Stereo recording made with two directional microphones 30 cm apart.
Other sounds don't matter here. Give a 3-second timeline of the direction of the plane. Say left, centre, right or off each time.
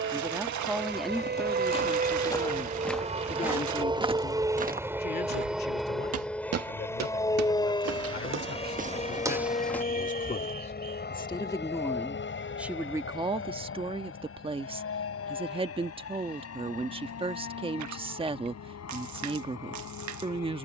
right, centre, centre, left, left, left, left.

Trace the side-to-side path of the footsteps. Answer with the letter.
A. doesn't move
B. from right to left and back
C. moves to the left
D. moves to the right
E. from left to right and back
E.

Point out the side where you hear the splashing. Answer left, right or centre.
right.